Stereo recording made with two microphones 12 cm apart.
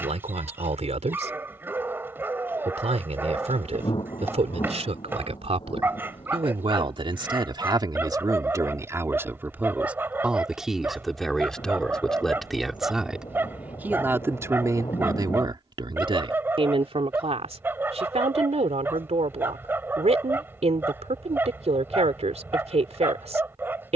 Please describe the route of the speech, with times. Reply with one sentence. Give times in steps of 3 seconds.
You can hear the speech on the right from 0 s, in the centre from 9 s and on the right from 15 s.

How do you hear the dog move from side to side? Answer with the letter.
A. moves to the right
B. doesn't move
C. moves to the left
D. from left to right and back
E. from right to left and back
B.